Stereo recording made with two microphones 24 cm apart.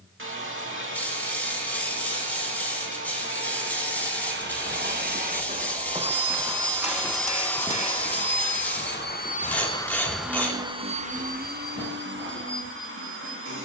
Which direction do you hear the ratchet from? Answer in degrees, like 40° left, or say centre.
10° left.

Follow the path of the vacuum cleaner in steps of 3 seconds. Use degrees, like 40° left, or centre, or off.
50° right, 40° right, 10° left, 10° right, 50° right.